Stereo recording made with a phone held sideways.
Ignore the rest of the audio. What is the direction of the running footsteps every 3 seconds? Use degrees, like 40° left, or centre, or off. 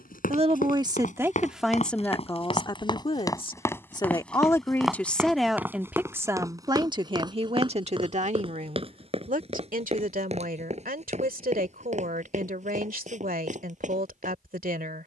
50° left, centre, 30° right, 40° right, 50° right.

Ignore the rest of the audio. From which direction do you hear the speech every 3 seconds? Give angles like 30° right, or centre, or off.
centre, 10° left, 40° right, 60° right, 70° right.